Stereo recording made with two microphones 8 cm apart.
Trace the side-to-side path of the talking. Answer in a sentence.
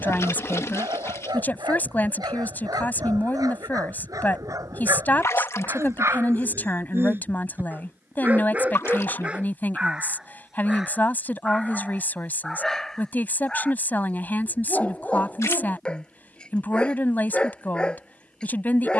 In this clip you hear the talking stay in one place.